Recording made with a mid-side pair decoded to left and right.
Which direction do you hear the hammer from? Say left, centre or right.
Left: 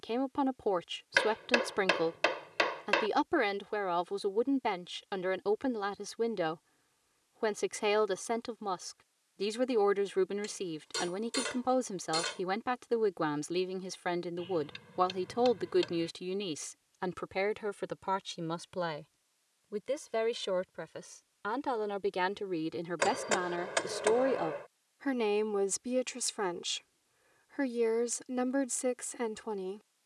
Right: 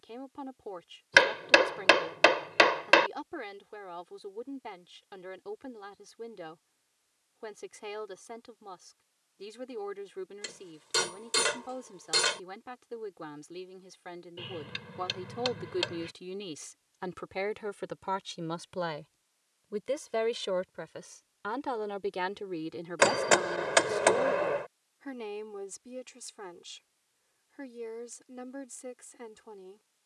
right.